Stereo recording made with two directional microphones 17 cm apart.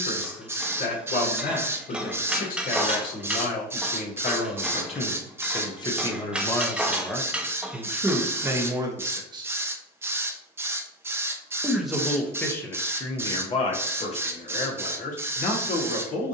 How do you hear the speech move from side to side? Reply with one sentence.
In this clip you hear the speech move from left to right and back again.